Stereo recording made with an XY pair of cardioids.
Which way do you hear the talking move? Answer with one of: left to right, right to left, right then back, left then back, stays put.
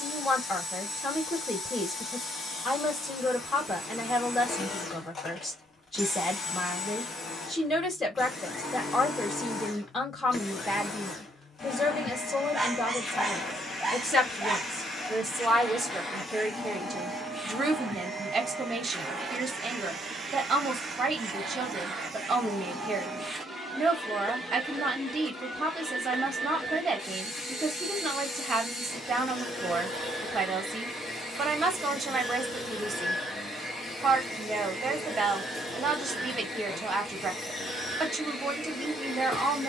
left to right.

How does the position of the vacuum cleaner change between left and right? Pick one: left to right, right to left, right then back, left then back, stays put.
right then back.